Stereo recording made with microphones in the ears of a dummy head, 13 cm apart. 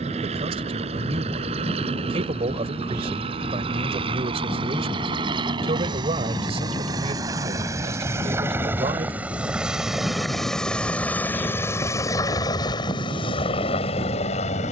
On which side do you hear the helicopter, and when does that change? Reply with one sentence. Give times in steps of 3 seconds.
In this clip you hear the helicopter on the right from 0 s, in the centre from 9 s and on the left from 12 s.